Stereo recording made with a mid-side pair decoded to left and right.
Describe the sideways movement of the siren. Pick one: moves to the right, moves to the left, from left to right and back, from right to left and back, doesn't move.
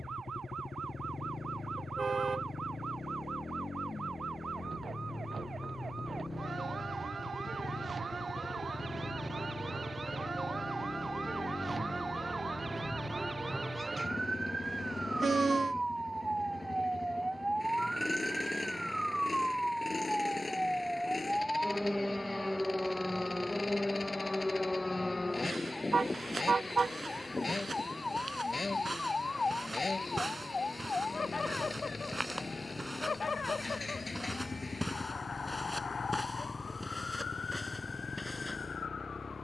moves to the left.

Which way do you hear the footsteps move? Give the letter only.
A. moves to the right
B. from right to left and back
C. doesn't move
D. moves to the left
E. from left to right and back
D.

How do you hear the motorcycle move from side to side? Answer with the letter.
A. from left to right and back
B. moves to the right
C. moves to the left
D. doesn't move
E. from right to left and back
D.